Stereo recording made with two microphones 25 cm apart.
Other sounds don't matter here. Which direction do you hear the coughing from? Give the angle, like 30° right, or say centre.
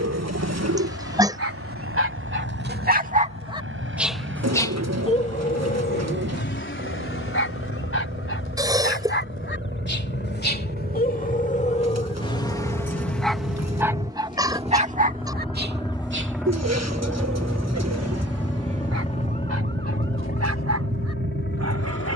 10° right.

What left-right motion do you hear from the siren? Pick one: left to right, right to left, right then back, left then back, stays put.
left to right.